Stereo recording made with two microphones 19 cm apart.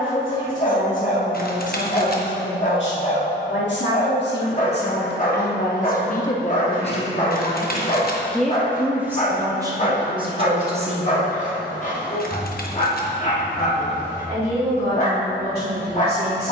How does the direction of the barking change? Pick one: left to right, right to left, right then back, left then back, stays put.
stays put.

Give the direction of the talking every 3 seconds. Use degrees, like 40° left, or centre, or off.
80° left, 60° left, 20° left, 20° right, 50° right, 60° right.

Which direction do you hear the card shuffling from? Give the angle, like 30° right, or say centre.
50° left.